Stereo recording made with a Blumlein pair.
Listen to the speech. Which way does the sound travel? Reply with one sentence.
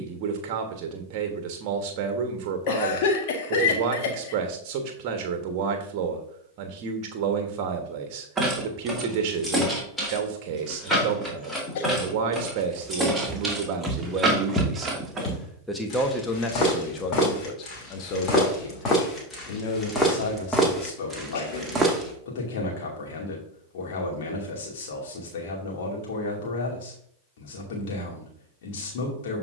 In this clip you hear the speech move to the left.